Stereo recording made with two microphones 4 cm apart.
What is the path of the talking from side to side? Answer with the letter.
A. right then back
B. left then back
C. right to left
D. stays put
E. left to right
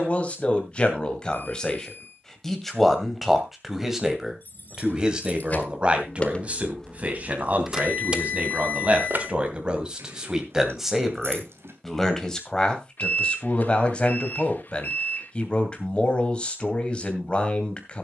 A.